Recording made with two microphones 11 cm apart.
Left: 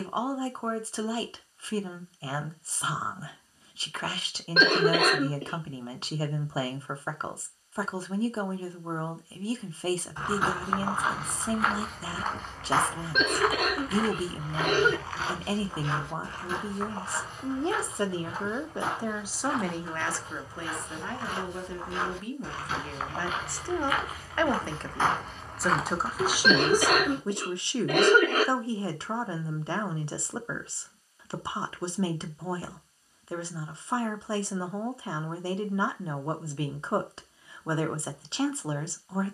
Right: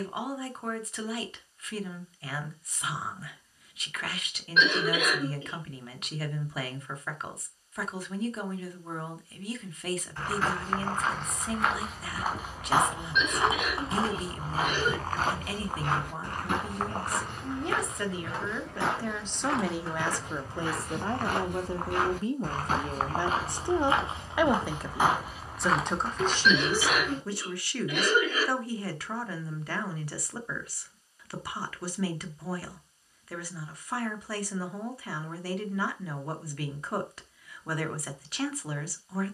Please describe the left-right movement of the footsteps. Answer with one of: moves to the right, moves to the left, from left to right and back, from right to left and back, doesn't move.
from left to right and back.